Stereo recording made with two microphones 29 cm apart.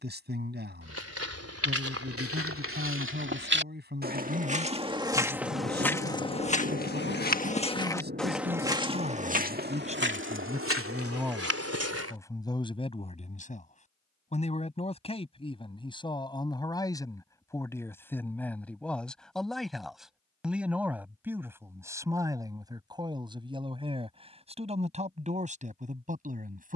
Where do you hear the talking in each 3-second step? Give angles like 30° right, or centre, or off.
30° right, 30° right, 30° right, 20° right, 20° left, 10° left, centre, 10° right, 20° right.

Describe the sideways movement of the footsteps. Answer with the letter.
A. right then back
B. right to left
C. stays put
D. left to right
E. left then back
E.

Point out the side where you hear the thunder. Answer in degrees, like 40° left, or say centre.
30° right.